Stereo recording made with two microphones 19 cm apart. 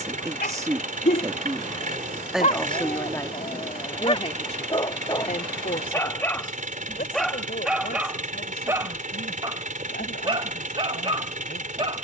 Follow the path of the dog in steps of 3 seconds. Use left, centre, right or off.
left, left, centre, right.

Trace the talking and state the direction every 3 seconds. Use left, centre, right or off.
centre, left, left, left.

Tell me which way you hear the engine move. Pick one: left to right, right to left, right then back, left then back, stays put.
stays put.